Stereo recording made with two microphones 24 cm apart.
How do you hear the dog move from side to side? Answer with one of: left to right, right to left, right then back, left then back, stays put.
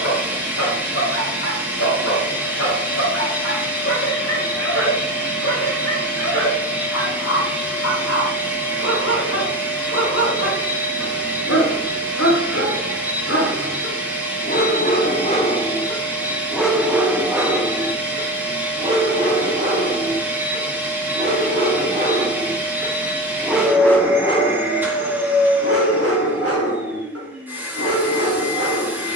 right then back.